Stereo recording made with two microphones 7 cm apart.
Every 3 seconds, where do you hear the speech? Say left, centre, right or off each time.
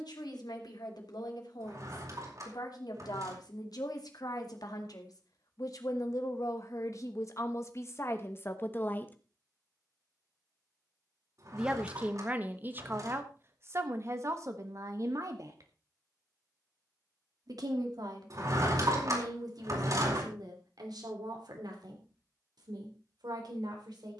left, left, left, centre, right, right, right, right.